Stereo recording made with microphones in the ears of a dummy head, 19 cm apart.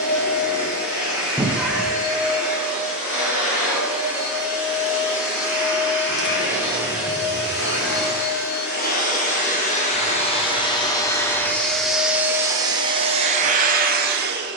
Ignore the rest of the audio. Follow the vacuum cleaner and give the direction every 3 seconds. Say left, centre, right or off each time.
left, left, left, left, right.